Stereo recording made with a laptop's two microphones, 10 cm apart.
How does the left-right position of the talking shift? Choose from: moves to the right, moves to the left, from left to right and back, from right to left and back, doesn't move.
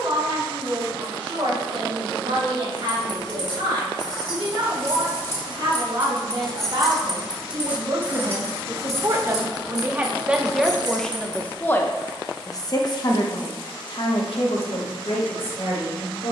moves to the left.